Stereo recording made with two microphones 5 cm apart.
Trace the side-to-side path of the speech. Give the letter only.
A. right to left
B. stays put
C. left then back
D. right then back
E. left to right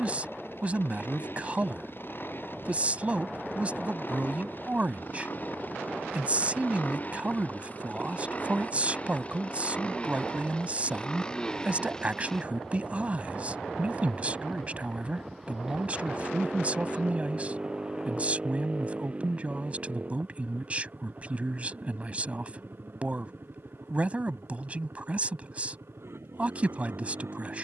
B.